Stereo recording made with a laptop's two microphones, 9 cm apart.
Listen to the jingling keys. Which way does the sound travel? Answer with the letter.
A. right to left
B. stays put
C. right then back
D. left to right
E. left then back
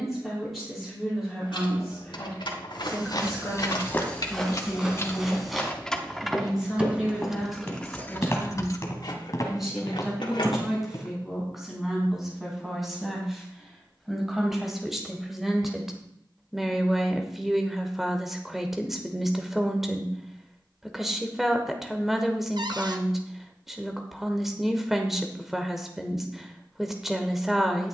C.